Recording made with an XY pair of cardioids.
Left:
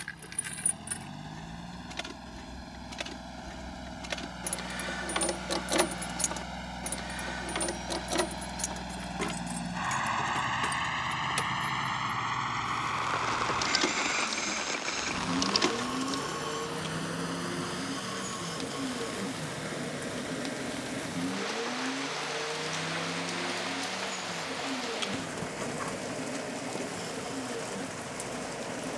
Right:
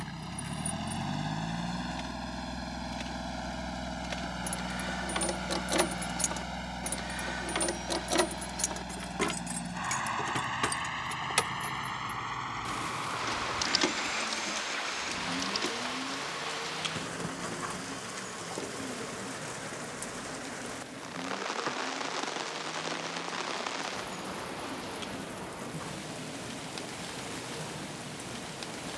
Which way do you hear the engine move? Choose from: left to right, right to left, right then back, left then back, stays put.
right to left.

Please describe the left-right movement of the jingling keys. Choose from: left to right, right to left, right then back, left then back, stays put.
right then back.